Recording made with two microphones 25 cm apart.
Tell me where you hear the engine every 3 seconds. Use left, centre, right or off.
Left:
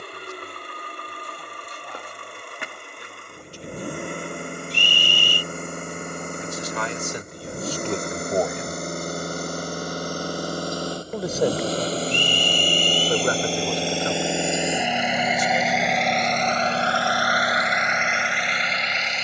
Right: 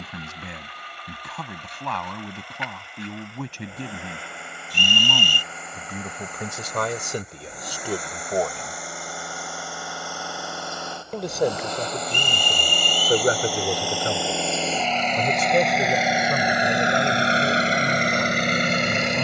left, left, left, left, left, centre, right.